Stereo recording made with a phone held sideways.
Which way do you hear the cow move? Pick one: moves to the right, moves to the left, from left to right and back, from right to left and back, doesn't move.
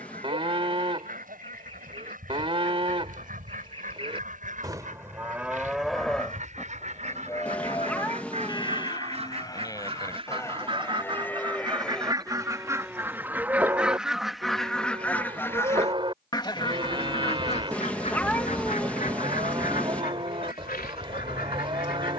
from right to left and back.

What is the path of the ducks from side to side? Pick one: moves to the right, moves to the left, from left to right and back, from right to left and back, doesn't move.
moves to the left.